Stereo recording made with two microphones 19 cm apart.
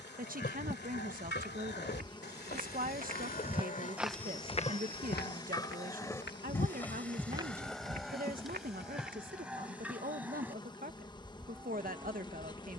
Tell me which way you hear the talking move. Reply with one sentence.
In this clip you hear the talking stay in one place.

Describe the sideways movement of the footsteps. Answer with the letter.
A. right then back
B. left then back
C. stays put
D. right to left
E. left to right
B.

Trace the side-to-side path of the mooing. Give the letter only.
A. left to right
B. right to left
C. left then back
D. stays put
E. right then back
A.